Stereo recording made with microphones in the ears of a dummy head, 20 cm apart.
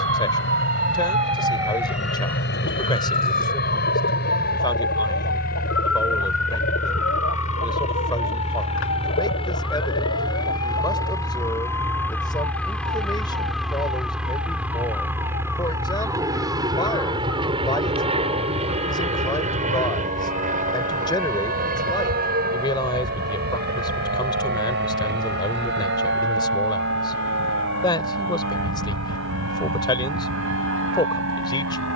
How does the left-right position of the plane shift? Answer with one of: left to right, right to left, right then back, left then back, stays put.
left to right.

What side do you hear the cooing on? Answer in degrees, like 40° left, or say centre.
60° left.